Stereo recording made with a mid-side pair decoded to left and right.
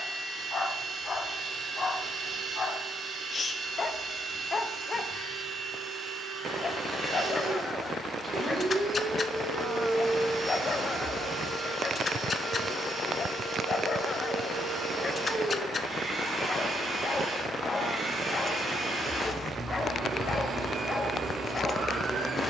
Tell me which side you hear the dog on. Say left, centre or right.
left.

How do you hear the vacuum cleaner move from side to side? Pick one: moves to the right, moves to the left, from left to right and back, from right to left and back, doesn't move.
doesn't move.